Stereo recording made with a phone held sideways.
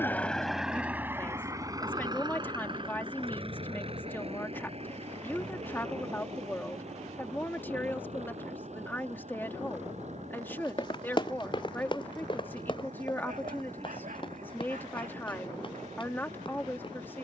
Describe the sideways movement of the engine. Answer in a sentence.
You can hear the engine move from left to right.